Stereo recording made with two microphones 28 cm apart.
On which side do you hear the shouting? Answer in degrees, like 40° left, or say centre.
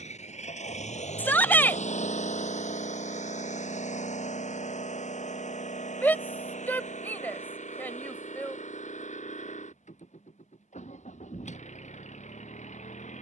10° left.